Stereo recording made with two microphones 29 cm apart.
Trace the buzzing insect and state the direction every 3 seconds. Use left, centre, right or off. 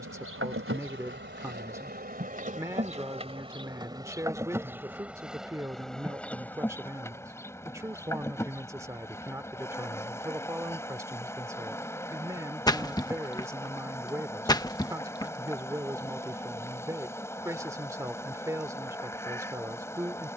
right, centre, centre, centre, centre, centre, centre.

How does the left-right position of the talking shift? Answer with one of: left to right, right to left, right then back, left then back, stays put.
stays put.